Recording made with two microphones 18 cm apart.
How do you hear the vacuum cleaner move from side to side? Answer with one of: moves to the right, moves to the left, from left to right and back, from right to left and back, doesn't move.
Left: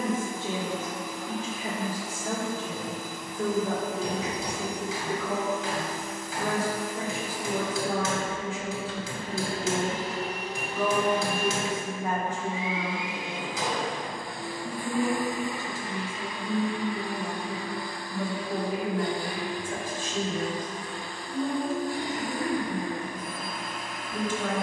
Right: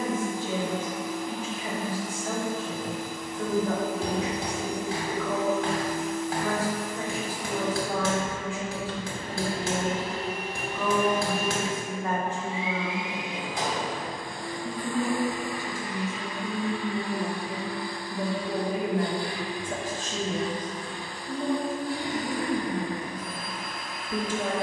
moves to the left.